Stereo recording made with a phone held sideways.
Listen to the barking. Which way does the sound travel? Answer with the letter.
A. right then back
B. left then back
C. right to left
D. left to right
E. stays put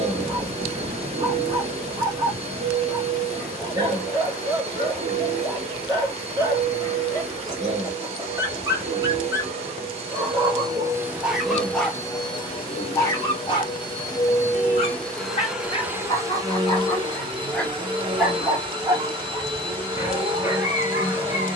B.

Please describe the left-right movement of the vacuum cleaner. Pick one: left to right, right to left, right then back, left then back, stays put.
left then back.